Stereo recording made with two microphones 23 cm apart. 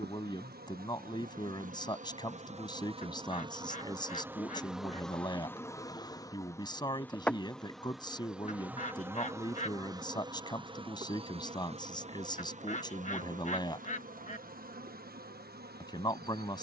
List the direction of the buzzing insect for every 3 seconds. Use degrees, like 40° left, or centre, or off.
40° right, 10° right, centre, 20° right, 40° right, 40° right.